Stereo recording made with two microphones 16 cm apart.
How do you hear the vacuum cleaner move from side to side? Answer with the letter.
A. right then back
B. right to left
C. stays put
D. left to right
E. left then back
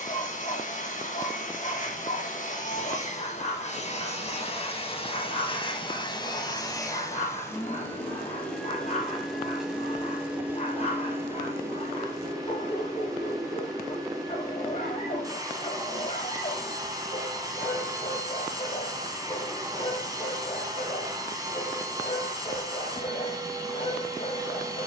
D.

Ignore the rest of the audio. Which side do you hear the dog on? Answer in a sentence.
In this clip you hear the dog on the left.